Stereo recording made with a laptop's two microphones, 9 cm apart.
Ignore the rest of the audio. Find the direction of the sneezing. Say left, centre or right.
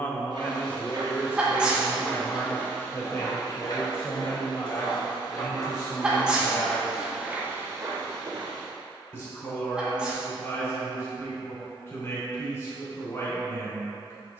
centre.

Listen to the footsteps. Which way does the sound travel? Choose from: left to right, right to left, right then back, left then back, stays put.
left then back.